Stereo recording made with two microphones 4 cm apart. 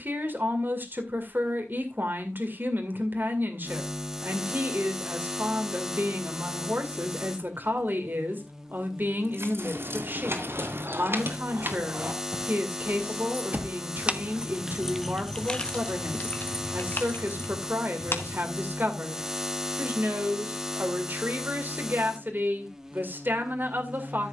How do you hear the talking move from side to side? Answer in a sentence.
You can hear the talking stay in one place.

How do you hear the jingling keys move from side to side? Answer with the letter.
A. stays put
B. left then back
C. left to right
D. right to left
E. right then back
D.